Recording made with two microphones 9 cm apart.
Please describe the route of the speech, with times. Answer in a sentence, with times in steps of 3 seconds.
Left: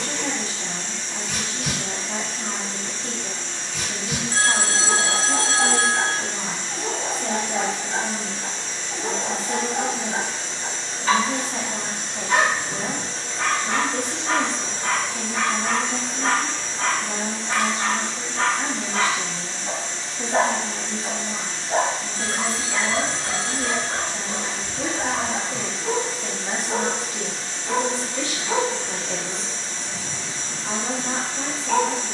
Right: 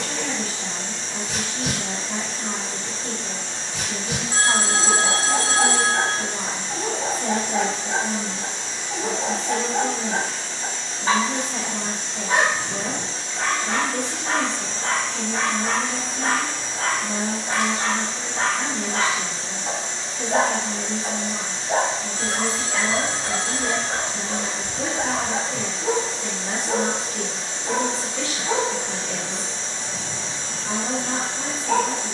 You can hear the speech on the left from 0 s, in the centre from 3 s and on the left from 9 s.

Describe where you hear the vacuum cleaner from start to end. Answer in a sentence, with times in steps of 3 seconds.
You can hear the vacuum cleaner on the right from 0 s, on the left from 9 s, in the centre from 15 s and on the right from 18 s.